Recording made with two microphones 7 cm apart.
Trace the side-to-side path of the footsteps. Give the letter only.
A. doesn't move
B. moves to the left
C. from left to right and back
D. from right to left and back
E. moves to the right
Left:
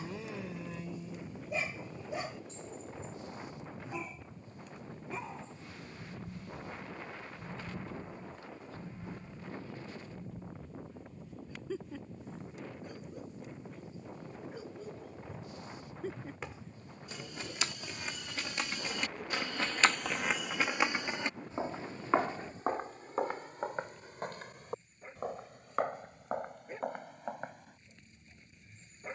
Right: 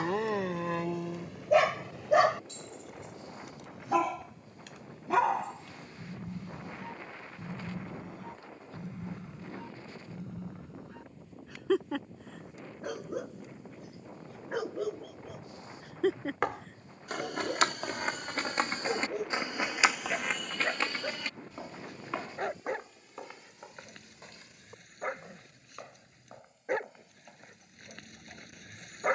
B.